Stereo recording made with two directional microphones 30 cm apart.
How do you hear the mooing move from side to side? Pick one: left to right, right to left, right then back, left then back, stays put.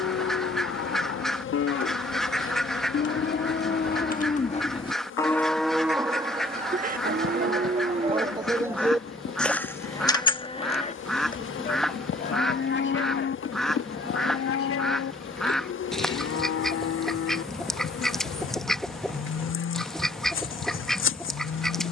right then back.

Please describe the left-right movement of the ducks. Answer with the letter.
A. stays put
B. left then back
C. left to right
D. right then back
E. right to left
A.